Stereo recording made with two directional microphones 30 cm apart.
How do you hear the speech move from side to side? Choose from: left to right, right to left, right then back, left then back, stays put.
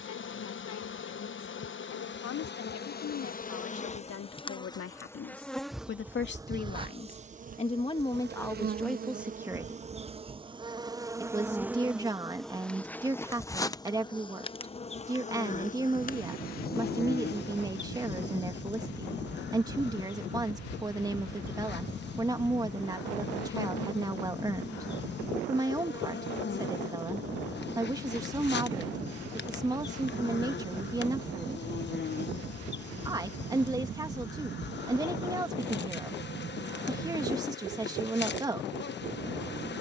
left to right.